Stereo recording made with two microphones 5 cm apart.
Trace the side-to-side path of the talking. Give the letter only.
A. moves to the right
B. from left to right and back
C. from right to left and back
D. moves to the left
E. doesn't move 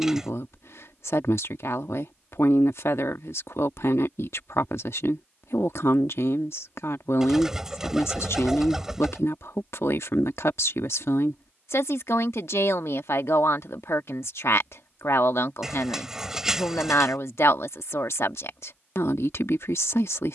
E.